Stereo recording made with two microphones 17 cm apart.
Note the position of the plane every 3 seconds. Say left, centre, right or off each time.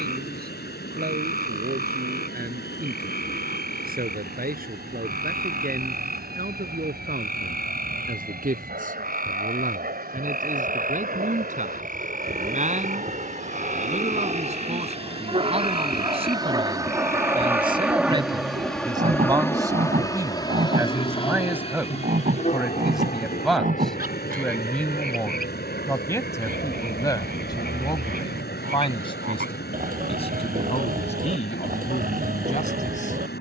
right, right, right, right, right, right, centre, left, left, left, left.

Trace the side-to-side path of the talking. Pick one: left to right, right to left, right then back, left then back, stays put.
right to left.